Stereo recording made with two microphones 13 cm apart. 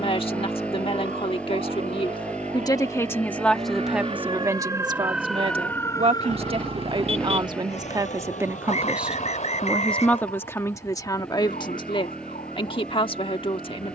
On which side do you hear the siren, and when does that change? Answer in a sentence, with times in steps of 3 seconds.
In this clip you hear the siren on the right from 0 s and on the left from 6 s.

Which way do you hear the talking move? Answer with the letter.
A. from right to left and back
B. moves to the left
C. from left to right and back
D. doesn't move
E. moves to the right
C.